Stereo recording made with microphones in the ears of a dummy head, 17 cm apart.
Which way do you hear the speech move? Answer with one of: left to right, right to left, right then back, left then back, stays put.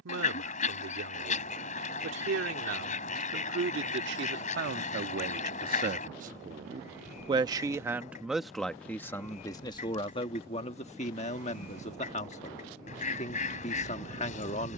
right to left.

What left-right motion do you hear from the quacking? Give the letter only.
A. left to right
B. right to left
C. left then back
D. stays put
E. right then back
D.